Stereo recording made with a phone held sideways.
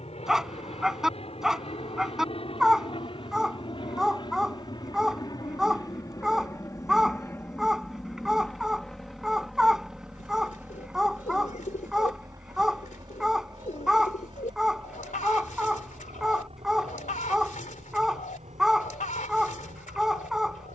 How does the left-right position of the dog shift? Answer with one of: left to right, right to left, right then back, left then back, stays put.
stays put.